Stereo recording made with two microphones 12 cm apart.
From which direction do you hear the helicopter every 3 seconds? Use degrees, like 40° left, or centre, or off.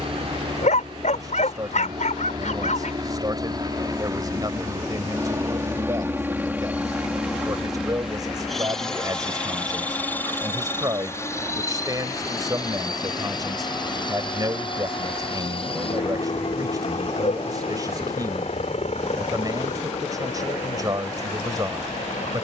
40° right, 30° right, 10° right, 20° left, 30° left, 50° left, 60° left, 60° left.